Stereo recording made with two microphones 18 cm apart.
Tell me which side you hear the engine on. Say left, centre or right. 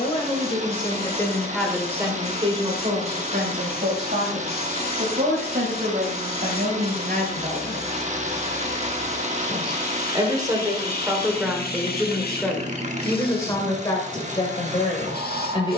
right.